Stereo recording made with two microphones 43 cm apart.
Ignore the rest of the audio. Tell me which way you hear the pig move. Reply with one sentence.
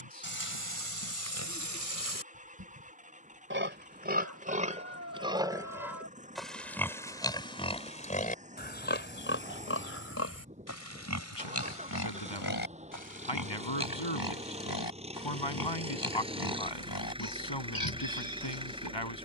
In this clip you hear the pig move from right to left.